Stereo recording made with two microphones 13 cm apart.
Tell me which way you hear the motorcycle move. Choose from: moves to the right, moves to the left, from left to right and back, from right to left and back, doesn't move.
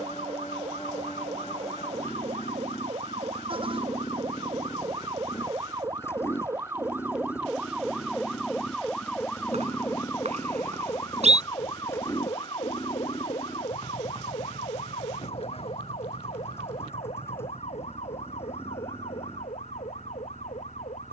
doesn't move.